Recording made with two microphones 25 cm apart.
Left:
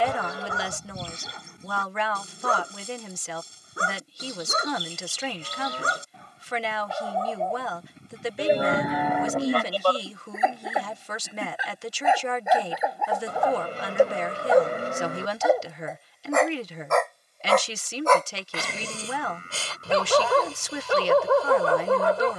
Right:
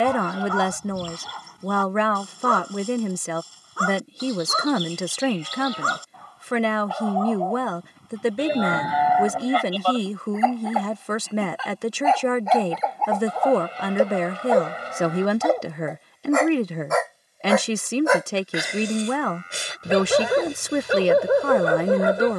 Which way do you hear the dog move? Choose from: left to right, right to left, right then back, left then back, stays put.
left to right.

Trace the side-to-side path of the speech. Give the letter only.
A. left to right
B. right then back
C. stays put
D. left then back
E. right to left
C.